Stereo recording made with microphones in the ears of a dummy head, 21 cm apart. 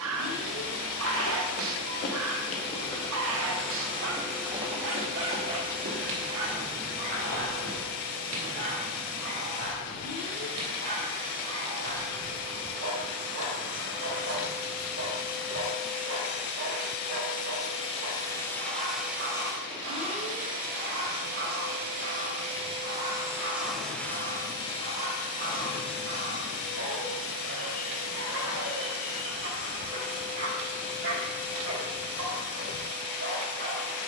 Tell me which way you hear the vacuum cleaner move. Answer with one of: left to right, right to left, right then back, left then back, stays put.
right then back.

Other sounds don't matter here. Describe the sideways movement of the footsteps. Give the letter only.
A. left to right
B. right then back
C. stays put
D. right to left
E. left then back
A.